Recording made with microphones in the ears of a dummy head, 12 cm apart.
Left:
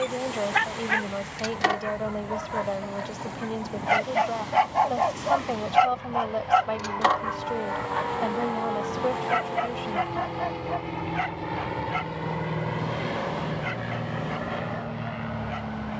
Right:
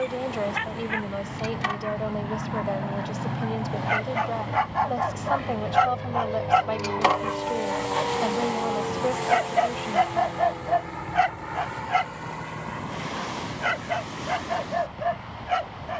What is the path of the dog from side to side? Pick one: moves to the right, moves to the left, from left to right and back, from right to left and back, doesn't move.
moves to the right.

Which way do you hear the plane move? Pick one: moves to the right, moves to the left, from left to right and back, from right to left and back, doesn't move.
moves to the left.